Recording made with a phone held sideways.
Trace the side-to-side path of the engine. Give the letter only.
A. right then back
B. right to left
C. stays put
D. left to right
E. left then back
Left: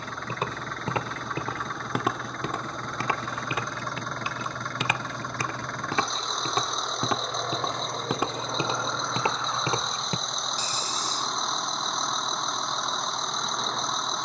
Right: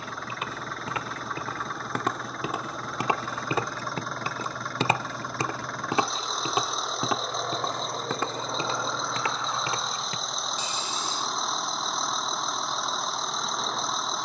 C.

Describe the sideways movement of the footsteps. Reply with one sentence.
In this clip you hear the footsteps go right and come back.